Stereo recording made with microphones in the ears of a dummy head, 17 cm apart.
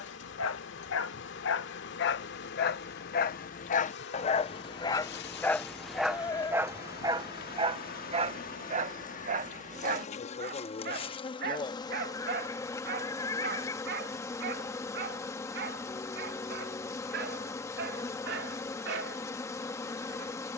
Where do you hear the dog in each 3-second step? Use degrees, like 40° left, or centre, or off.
60° left, 30° left, 20° right, 50° right, 60° right, 60° right, 70° right.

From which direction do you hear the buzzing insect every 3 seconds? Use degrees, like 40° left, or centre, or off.
60° left, 60° left, 50° left, 30° left, 20° left, 10° left, 10° left.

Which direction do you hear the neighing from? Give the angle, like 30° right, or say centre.
20° left.